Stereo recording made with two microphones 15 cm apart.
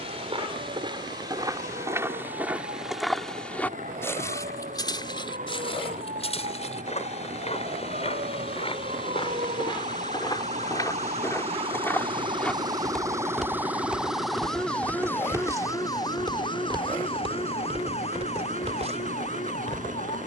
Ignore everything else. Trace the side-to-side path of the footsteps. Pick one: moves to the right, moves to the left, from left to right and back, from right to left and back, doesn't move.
from right to left and back.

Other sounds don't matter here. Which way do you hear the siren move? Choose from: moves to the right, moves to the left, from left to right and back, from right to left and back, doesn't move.
moves to the left.